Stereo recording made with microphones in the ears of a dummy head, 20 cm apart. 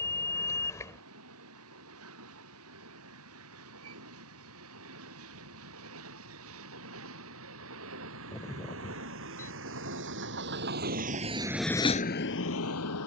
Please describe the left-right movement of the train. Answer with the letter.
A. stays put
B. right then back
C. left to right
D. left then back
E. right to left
E.